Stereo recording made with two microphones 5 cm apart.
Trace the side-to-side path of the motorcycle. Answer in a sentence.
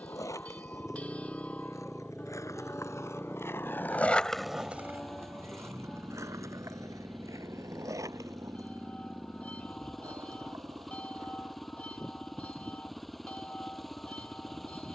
In this clip you hear the motorcycle stay in one place.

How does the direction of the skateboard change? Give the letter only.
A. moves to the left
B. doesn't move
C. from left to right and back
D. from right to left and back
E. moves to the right
E.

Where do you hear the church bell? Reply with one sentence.
You can hear the church bell on the left.